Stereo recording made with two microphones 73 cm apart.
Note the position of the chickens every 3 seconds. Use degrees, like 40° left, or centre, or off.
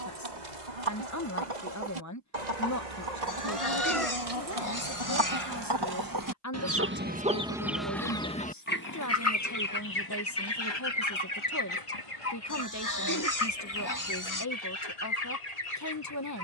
70° right, 50° right, 10° right, 30° left, 50° left, 60° left.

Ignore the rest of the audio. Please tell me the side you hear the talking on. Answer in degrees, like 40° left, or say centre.
20° left.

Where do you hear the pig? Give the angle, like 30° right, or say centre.
30° left.